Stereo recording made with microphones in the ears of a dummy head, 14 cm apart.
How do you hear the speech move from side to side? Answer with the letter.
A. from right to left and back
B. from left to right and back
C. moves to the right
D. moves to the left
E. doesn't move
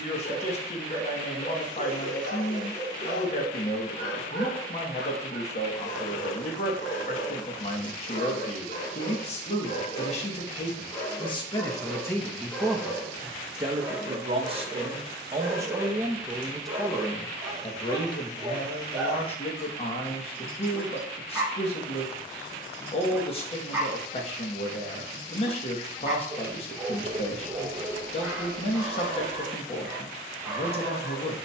B.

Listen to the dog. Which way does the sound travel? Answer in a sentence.
You can hear the dog move from left to right.